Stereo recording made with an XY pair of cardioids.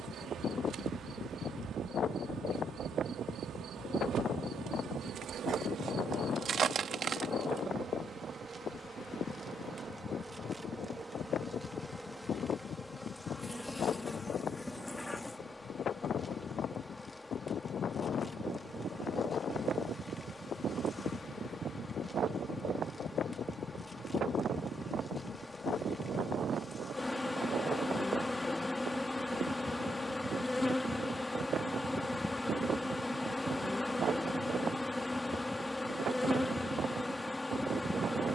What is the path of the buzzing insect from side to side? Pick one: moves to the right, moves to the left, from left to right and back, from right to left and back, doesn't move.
moves to the left.